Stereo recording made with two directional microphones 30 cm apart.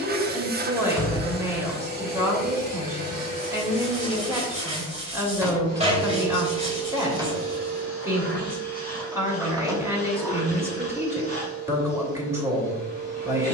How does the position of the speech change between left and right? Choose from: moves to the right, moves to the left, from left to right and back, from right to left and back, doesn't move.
doesn't move.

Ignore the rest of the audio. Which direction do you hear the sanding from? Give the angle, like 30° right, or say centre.
20° right.